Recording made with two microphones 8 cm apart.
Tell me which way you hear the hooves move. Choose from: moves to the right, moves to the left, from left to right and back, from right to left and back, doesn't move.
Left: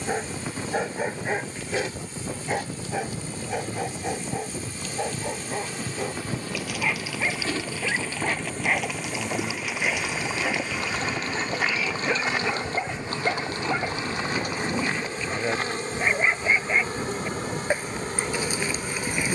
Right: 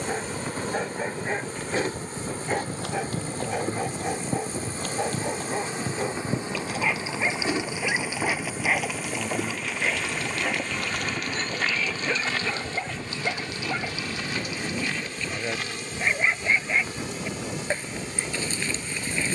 moves to the left.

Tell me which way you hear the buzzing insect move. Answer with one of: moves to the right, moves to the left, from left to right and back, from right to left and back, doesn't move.
moves to the left.